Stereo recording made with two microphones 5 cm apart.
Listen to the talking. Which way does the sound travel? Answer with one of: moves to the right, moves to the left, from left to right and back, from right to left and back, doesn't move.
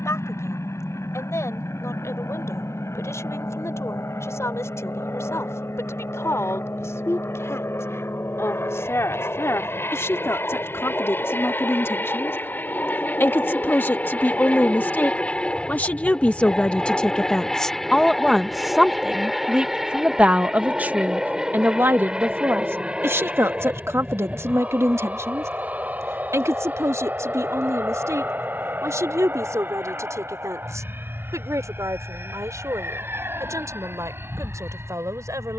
moves to the right.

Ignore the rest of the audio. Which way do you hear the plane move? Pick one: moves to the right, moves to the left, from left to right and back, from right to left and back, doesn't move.
moves to the right.